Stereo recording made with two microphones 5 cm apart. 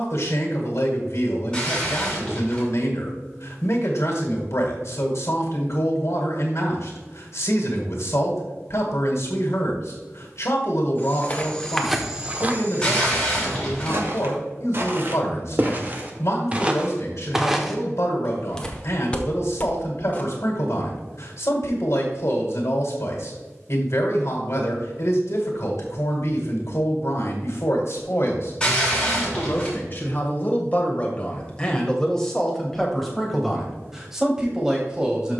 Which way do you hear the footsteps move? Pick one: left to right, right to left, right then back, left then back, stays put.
right then back.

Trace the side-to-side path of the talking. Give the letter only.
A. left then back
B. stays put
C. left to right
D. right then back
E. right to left
C.